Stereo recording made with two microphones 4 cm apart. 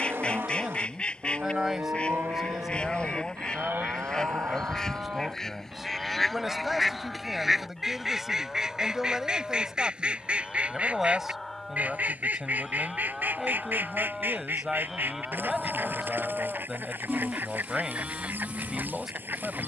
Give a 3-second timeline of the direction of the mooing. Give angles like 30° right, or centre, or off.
60° right, 50° right, centre, 10° left, centre, 10° right, 30° right.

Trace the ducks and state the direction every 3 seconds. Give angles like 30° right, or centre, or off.
20° left, 10° left, 10° right, 30° right, 50° right, 50° right, 50° right.